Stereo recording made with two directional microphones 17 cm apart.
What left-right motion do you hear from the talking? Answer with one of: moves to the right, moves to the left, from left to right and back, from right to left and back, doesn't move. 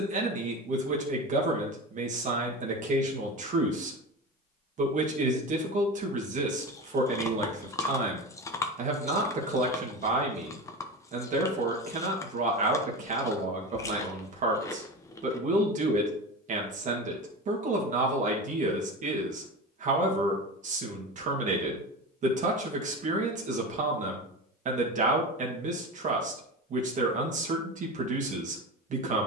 doesn't move.